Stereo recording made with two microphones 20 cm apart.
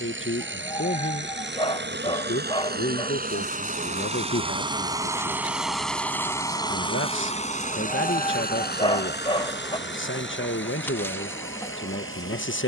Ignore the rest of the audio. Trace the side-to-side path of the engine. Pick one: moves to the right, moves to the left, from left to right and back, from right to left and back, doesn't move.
moves to the left.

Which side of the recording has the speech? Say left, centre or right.
left.